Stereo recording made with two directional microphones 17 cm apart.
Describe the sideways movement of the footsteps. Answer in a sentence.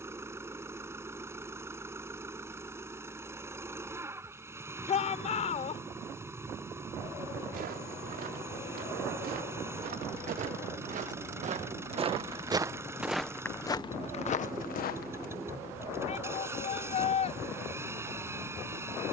In this clip you hear the footsteps move to the left.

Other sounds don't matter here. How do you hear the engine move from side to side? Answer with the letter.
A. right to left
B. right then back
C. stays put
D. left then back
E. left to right
C.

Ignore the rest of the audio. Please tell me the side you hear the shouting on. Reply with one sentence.
You can hear the shouting on the left.